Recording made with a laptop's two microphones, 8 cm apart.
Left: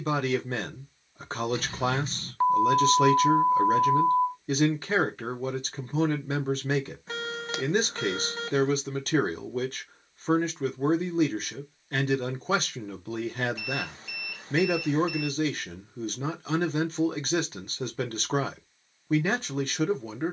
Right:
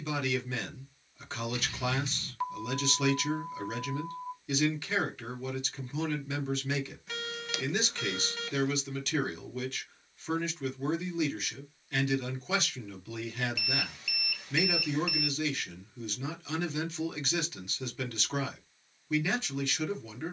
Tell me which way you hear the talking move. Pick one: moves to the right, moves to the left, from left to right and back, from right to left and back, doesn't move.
doesn't move.